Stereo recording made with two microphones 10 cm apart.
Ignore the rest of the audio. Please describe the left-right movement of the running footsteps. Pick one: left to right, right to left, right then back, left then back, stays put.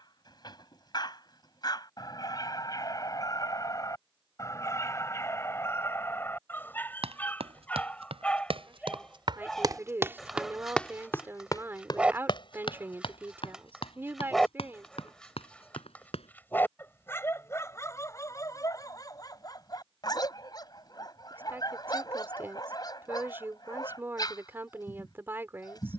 right to left.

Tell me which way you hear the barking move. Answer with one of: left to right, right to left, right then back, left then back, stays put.
right then back.